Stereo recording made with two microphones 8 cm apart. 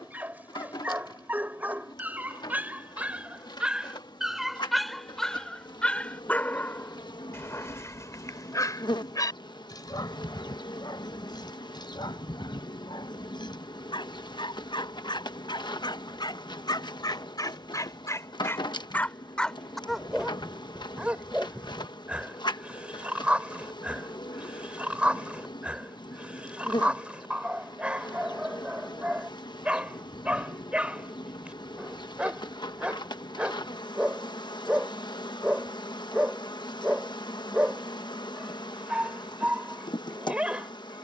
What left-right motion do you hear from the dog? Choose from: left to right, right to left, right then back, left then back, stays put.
left then back.